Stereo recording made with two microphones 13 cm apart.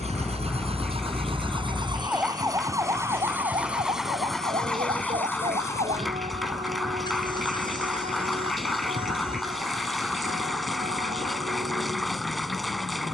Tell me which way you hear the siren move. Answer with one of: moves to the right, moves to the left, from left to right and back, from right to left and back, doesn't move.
moves to the right.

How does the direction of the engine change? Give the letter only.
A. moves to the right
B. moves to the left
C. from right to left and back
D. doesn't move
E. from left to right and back
B.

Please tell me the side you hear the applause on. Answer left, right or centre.
centre.